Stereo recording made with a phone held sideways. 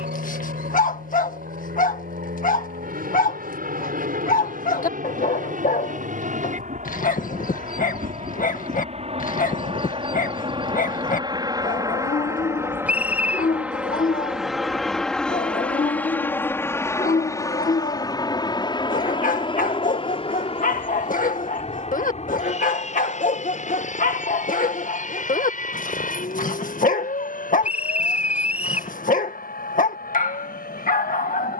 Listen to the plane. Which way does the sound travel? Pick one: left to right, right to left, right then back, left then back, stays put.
right to left.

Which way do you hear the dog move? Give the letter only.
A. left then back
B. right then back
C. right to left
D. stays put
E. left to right
D.